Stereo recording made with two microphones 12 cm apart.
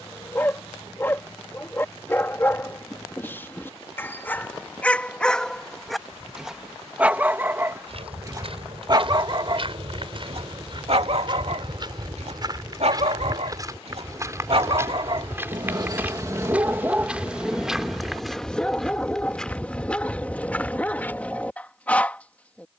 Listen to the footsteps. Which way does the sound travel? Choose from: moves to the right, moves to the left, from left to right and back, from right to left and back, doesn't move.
moves to the left.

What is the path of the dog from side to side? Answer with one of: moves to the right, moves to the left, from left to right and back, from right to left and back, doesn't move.
from left to right and back.